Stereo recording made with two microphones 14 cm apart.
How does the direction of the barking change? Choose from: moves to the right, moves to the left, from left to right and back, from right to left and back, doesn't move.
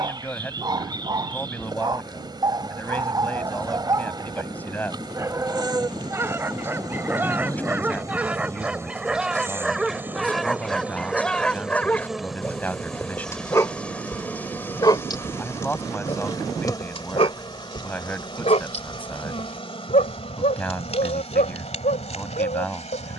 moves to the left.